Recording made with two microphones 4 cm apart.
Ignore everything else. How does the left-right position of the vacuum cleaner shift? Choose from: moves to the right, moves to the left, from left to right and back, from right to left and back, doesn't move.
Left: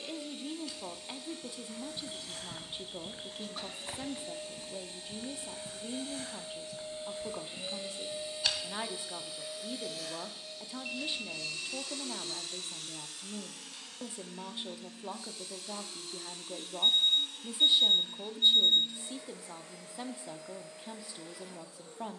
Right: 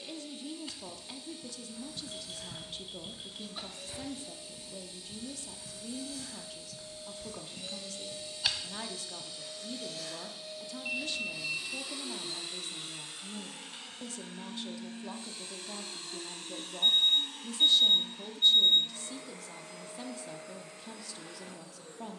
moves to the right.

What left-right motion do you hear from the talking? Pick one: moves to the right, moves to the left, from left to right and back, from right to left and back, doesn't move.
doesn't move.